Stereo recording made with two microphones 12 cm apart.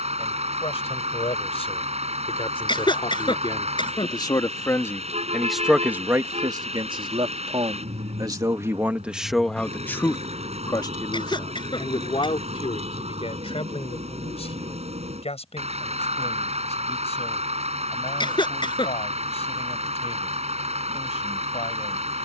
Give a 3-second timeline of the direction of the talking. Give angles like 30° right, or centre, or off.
60° left, 30° left, 40° right, 30° left, 60° left, 70° left, 70° left, 70° left.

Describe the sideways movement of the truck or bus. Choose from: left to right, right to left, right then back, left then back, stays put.
stays put.